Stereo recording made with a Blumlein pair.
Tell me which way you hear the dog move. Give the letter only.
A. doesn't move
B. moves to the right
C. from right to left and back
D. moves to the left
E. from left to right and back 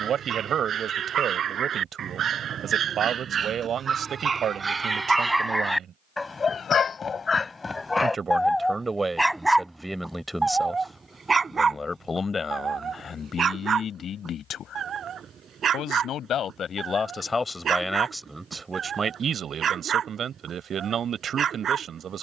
C.